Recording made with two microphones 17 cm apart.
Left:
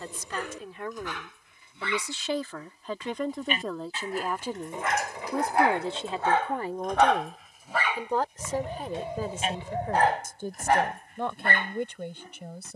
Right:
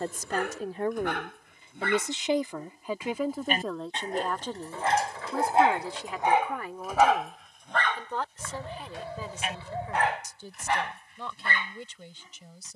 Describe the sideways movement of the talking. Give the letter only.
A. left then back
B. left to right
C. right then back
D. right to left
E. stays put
D.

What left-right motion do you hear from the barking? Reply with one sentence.
In this clip you hear the barking travel towards the left.